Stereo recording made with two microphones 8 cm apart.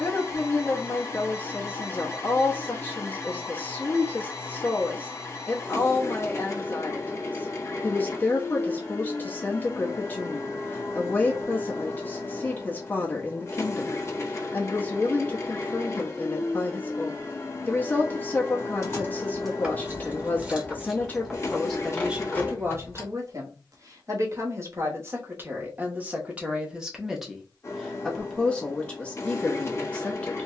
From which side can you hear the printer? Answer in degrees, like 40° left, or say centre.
30° left.